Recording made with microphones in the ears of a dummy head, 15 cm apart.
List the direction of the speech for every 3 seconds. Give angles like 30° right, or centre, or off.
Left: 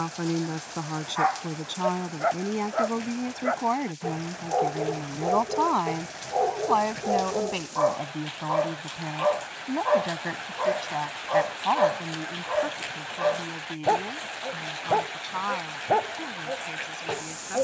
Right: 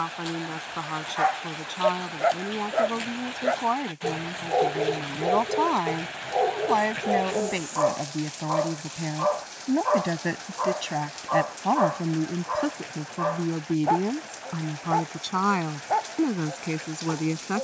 10° left, centre, 10° right, 30° right, 50° right, 60° right.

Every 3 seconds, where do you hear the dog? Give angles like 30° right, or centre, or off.
30° right, 20° right, centre, 10° left, 30° left, 40° left.